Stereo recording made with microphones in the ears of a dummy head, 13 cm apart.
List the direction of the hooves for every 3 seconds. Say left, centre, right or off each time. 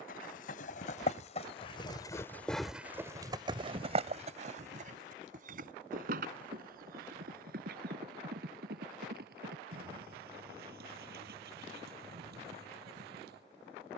left, right, right, right, right.